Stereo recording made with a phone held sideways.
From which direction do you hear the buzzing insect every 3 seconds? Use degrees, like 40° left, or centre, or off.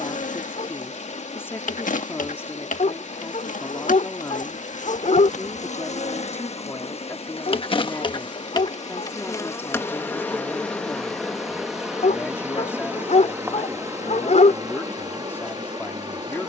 60° left, 60° left, 40° left, 10° left, 20° right, 30° right.